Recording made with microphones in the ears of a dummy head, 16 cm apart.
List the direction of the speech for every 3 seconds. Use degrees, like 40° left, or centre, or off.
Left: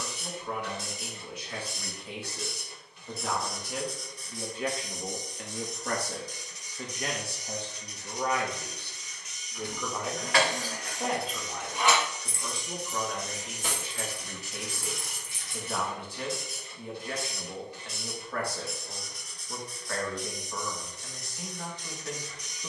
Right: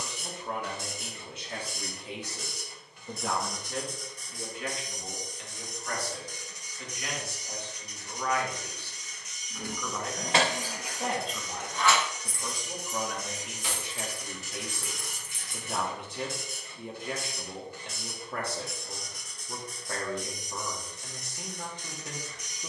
20° right, 20° left, 30° left, centre, 10° right, 20° right, 20° right, 20° right.